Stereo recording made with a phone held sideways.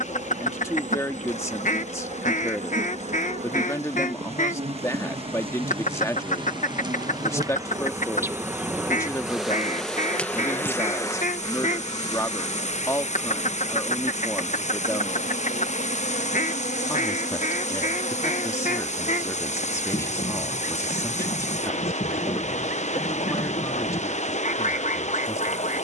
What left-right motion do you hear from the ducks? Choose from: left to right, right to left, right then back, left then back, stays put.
stays put.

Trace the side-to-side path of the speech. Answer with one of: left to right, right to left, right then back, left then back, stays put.
stays put.